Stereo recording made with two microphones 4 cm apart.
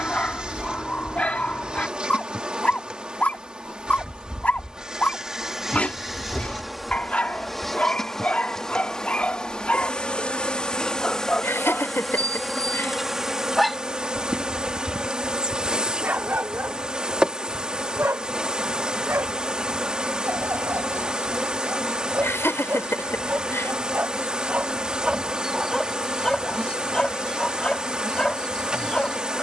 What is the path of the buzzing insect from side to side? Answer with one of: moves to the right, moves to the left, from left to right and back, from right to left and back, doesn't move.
from right to left and back.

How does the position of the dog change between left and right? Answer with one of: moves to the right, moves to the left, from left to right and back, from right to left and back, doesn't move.
from left to right and back.